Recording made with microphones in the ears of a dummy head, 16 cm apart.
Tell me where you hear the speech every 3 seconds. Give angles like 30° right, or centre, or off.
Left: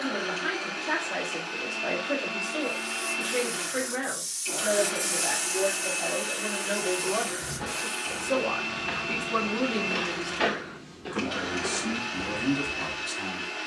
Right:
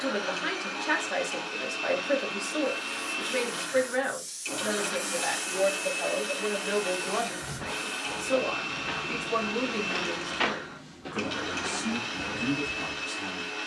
60° right, 50° right, 20° right, 10° left, 30° left.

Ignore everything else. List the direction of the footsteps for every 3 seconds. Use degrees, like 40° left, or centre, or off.
off, off, centre, 10° right, 10° left.